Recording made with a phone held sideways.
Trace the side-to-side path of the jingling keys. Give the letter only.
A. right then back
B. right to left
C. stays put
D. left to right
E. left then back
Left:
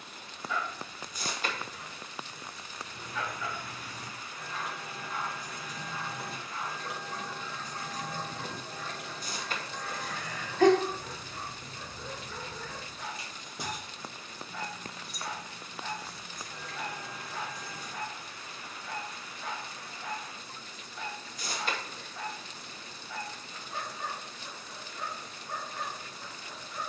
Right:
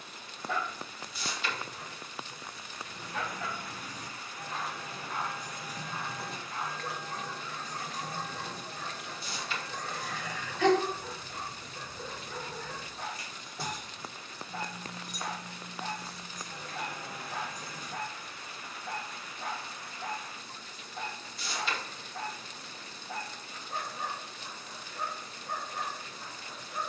E.